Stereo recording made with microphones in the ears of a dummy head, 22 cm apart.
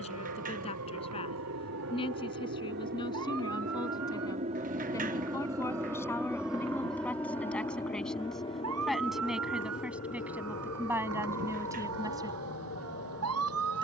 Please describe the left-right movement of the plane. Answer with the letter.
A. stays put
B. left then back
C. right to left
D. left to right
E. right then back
C.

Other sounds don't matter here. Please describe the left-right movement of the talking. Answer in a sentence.
In this clip you hear the talking go from the left side to the right.